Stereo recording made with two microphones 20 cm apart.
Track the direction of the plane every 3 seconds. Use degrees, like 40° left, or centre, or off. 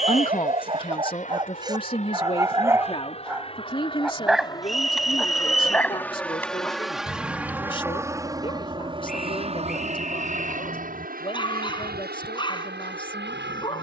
40° left, 20° left, 10° right, 40° right, 60° right.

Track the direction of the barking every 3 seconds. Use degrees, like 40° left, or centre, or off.
20° right, centre, 20° left, 20° left, 20° left.